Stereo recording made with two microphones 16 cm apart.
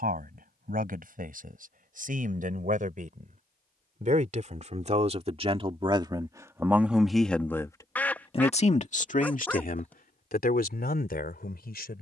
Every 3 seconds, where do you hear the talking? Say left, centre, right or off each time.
right, right, centre, left.